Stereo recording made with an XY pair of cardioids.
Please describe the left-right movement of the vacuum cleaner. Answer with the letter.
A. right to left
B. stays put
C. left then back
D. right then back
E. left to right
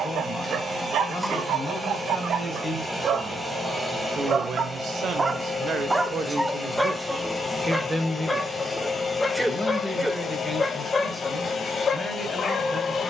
A.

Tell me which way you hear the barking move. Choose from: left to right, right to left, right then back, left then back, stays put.
right to left.